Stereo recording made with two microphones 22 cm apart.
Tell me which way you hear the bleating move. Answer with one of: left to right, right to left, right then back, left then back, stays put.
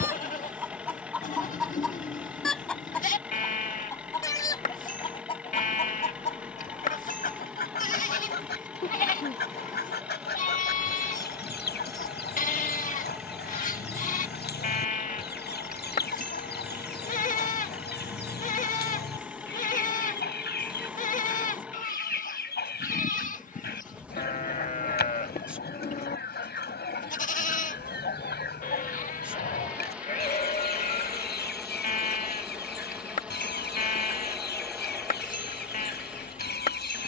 stays put.